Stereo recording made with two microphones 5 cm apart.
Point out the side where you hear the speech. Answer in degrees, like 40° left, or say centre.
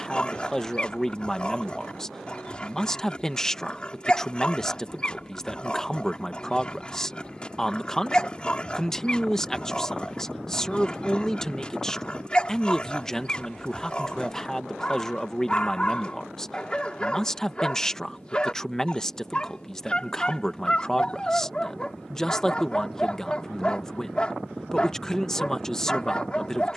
10° left.